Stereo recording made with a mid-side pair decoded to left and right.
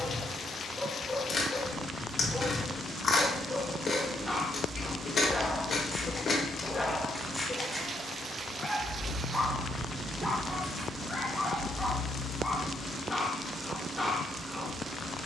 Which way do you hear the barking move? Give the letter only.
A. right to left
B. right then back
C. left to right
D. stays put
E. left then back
D.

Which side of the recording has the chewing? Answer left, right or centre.
left.